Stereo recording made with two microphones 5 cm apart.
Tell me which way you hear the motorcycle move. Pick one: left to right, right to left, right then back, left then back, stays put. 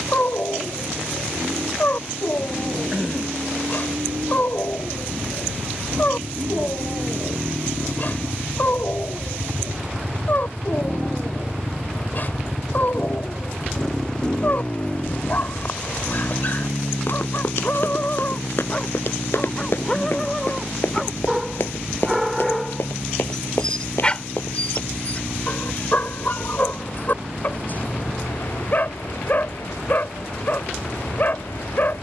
right to left.